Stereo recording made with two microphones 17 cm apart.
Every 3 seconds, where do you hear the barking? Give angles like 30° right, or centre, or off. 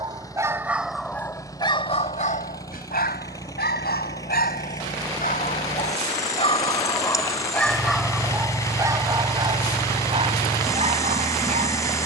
20° left, 60° left, 10° left, 30° right.